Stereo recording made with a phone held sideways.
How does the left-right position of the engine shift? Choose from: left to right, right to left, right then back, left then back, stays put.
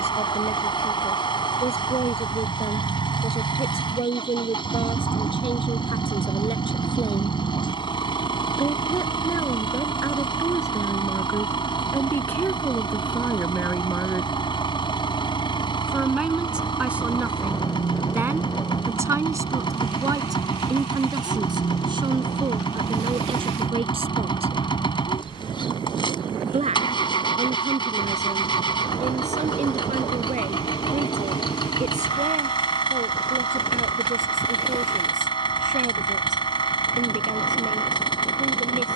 stays put.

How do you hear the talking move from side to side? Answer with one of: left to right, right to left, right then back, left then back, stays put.
left to right.